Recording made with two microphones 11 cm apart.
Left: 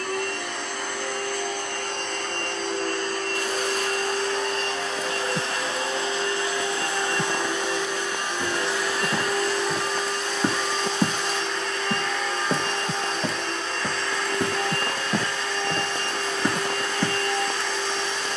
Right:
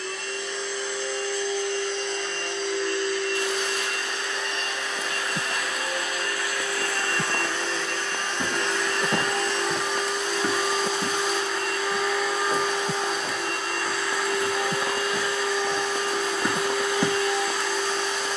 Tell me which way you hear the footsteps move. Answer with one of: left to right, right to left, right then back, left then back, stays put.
left then back.